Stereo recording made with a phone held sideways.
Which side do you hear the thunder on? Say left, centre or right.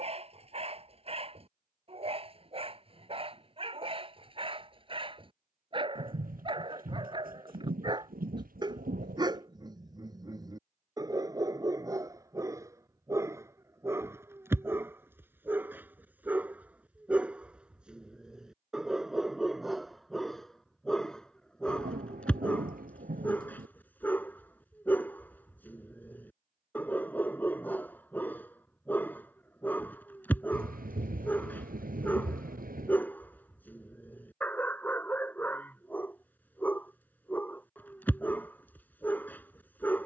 right.